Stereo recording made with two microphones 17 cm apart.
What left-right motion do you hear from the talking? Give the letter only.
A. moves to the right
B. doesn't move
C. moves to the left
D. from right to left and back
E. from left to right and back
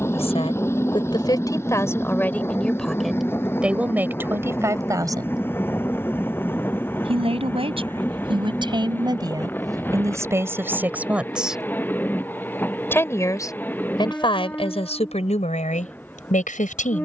E.